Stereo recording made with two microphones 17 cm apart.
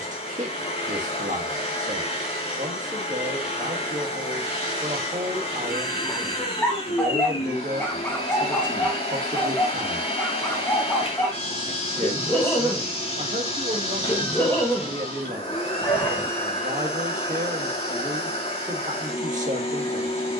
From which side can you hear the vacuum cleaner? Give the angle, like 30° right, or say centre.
40° left.